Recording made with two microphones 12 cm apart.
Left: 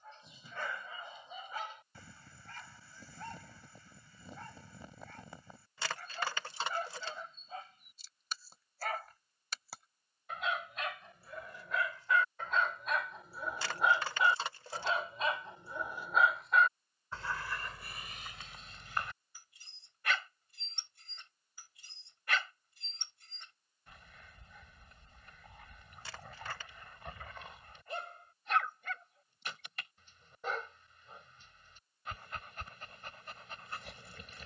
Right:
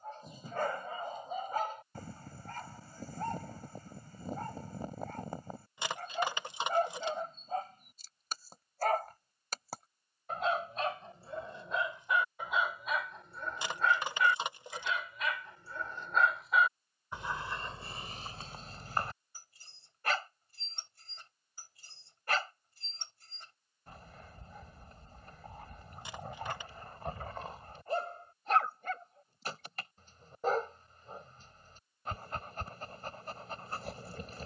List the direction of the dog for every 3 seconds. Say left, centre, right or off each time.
right, right, right, right, centre, centre, right, right, right, right, right, right.